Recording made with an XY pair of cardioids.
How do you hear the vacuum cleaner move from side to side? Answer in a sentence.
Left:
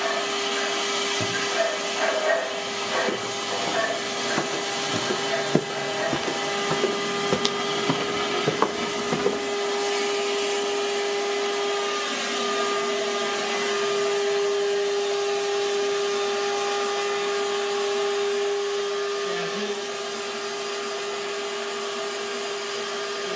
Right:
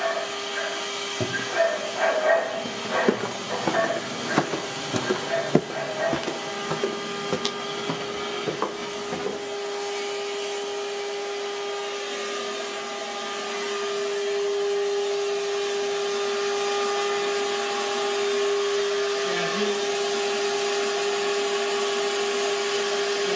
You can hear the vacuum cleaner move from left to right.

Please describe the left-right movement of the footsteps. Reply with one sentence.
You can hear the footsteps move from right to left.